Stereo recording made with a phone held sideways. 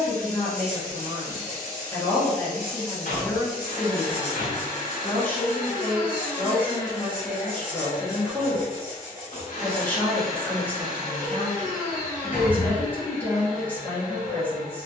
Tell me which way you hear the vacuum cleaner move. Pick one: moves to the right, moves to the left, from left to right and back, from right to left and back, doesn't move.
doesn't move.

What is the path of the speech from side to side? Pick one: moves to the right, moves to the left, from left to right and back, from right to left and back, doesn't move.
doesn't move.